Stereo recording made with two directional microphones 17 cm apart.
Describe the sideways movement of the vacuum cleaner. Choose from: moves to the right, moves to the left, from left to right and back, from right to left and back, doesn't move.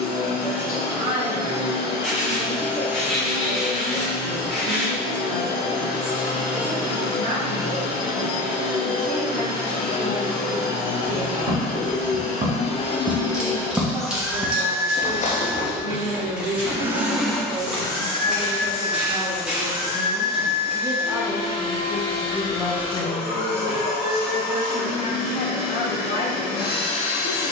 from left to right and back.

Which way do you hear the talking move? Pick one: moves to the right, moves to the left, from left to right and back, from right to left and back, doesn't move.
moves to the left.